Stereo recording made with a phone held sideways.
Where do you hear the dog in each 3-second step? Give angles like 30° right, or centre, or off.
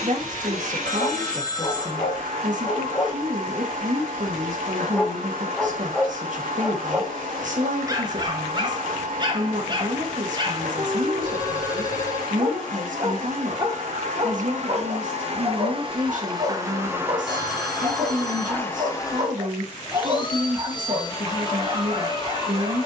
40° left, 10° left, 20° right, 30° right, 30° right, 30° right, 30° right, 30° right.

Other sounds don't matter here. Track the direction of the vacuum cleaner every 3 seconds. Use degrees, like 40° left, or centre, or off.
70° right, 70° right, 70° right, 70° right, 60° right, 20° right, 30° left, 30° left.